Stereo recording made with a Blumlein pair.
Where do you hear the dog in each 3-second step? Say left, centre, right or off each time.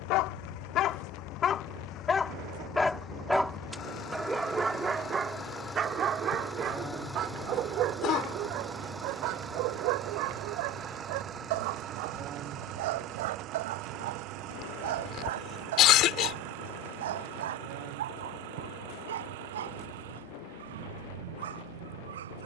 left, centre, right, right, right, right, right, right.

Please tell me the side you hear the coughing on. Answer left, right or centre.
left.